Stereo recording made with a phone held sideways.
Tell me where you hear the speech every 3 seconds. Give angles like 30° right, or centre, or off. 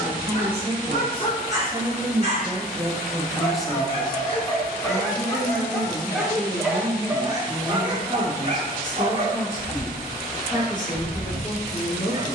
30° right, 10° left, 30° left, 30° left.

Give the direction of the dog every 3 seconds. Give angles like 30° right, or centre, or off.
40° left, 20° left, 20° right, 40° right.